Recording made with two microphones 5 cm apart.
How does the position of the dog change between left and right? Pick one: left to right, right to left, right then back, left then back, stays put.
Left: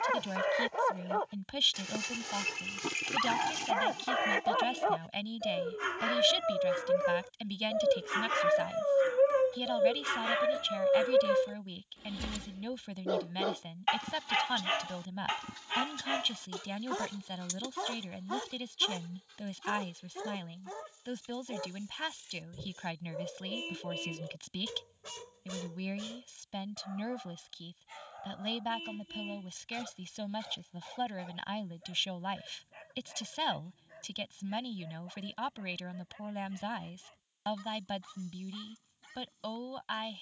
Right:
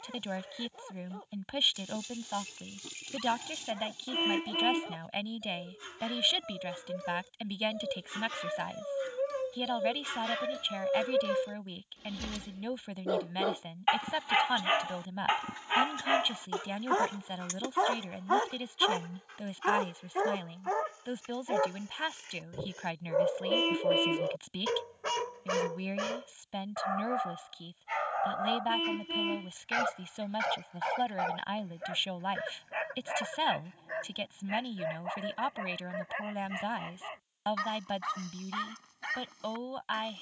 left to right.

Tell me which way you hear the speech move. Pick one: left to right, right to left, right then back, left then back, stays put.
stays put.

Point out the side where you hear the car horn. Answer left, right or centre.
right.